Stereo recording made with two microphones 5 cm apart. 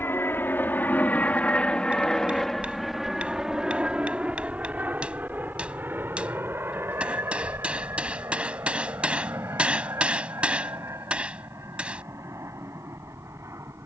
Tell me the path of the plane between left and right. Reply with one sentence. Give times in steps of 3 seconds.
In this clip you hear the plane on the left from 0 s and on the right from 3 s.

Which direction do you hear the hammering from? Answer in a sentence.
In this clip you hear the hammering on the right.